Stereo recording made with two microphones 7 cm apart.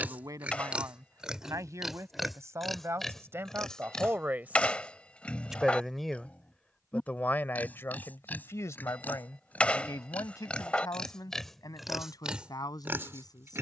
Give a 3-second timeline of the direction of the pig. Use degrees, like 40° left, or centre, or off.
10° right, 10° left, 20° left, 10° left, 30° right.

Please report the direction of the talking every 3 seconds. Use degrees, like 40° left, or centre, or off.
50° right, 20° right, 30° left, 60° left, 70° left.